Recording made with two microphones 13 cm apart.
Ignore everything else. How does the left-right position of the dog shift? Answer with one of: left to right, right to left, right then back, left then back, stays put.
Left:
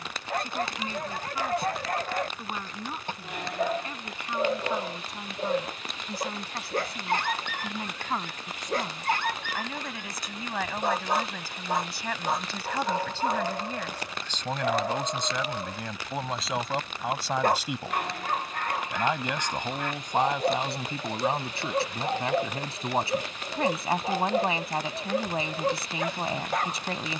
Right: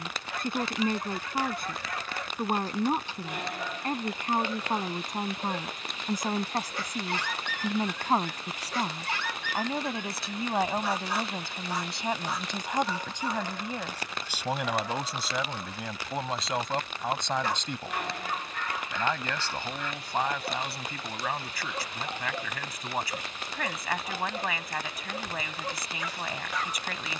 stays put.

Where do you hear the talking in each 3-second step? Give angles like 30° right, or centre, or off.
50° right, 50° right, 40° right, 30° right, 10° right, centre, 20° left, 30° left, 30° left.